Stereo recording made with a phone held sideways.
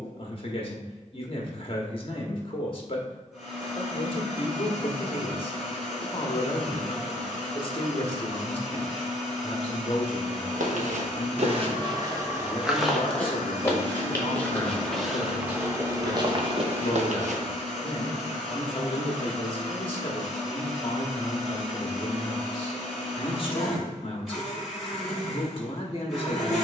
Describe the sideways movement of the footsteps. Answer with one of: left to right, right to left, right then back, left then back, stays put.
left then back.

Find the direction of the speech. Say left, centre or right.
left.